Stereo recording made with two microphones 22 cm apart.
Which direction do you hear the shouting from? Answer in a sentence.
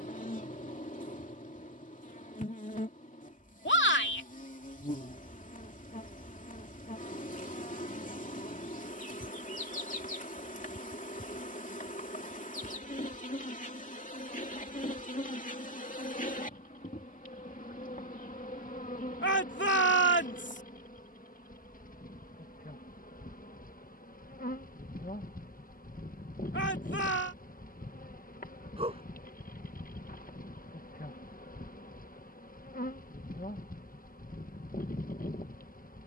You can hear the shouting on the left.